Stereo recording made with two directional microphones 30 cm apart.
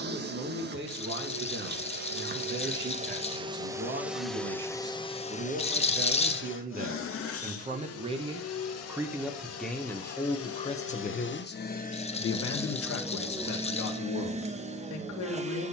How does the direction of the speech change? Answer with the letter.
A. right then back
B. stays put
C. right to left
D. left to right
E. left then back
C.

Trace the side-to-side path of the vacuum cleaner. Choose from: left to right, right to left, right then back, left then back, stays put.
left then back.